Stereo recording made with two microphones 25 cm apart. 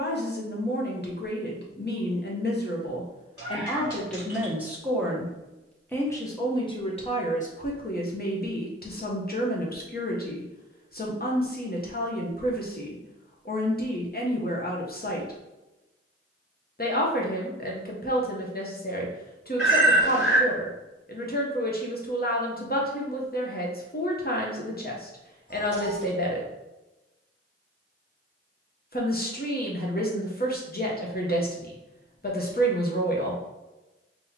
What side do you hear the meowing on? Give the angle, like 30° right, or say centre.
60° left.